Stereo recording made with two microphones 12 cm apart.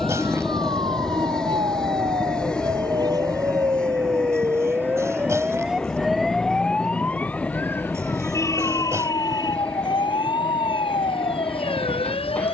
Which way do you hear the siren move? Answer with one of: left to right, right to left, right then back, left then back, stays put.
right to left.